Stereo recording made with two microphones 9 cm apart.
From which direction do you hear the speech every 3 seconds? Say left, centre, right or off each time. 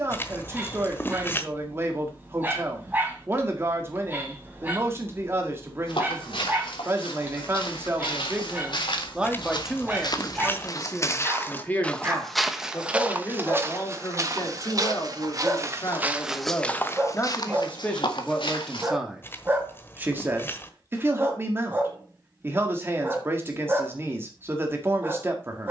right, right, right, centre, left, left, centre, right, right.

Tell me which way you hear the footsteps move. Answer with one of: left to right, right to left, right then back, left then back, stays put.
right then back.